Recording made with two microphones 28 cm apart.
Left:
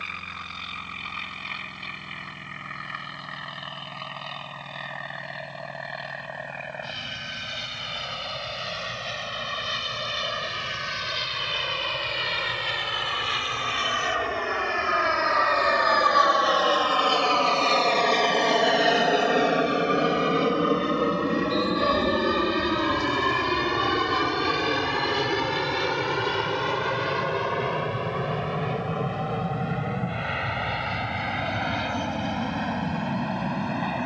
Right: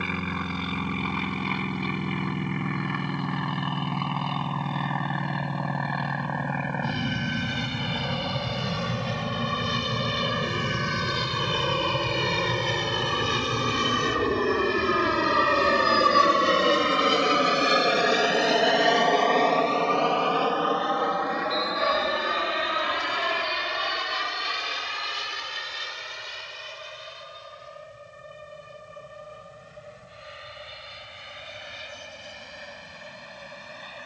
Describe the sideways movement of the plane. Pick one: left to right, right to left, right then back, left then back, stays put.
right to left.